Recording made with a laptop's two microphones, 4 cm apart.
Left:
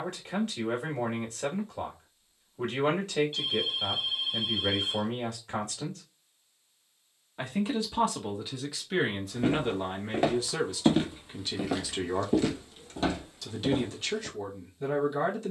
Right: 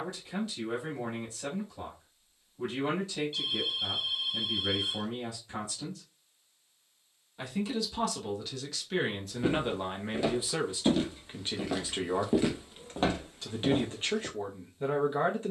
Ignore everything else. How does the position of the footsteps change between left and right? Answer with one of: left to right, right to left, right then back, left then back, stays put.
left to right.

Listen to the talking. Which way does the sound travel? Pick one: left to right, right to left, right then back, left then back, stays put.
left to right.